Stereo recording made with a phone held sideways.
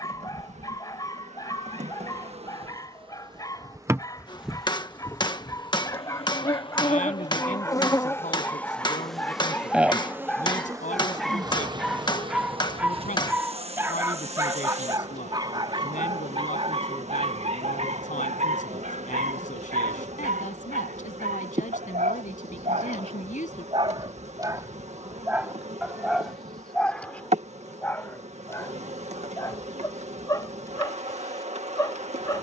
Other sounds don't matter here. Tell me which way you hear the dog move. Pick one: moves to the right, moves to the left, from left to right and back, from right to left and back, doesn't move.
from left to right and back.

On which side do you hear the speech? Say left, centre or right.
left.